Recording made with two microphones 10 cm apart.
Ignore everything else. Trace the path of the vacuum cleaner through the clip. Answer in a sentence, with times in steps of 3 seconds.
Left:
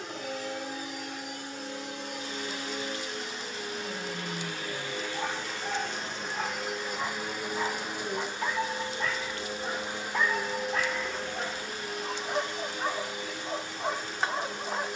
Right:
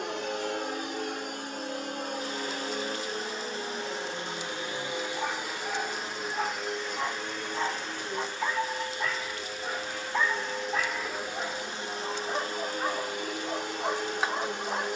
You can hear the vacuum cleaner on the right from 0 s, in the centre from 6 s and on the right from 12 s.